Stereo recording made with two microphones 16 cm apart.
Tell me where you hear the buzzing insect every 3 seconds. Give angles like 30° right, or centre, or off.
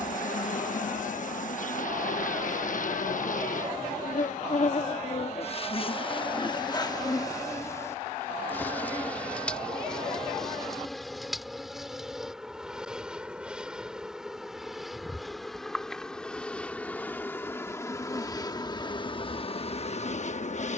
60° left, 50° left, 20° left, centre, centre, 10° left, 40° left.